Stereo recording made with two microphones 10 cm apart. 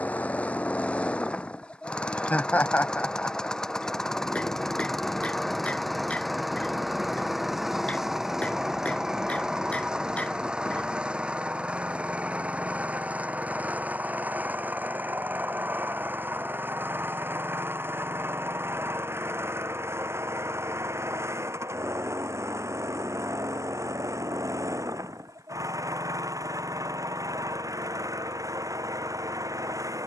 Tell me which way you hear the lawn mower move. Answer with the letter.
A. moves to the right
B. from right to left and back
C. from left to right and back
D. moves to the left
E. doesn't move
A.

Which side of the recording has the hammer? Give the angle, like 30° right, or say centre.
10° left.